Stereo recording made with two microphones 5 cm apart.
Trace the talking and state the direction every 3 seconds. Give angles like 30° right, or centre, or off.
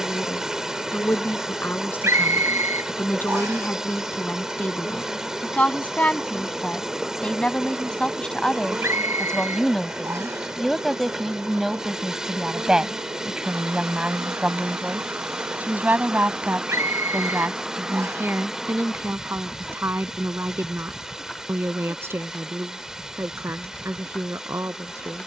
50° left, 40° left, 20° left, centre, 20° right, 40° right, 60° right, 70° right, 70° right.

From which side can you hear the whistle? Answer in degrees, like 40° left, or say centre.
80° right.